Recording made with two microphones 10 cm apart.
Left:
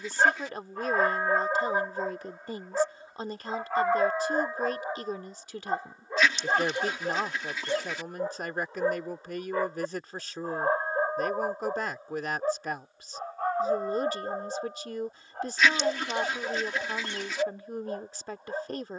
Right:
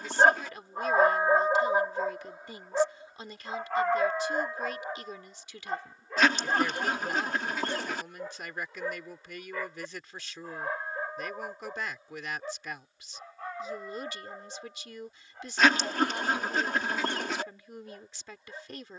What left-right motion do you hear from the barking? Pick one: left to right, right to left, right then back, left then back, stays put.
right to left.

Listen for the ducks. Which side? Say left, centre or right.
right.